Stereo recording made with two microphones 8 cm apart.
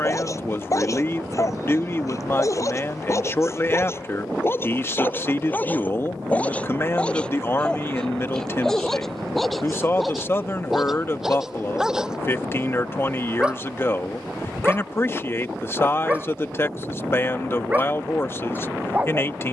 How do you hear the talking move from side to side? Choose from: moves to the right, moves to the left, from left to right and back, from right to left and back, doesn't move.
doesn't move.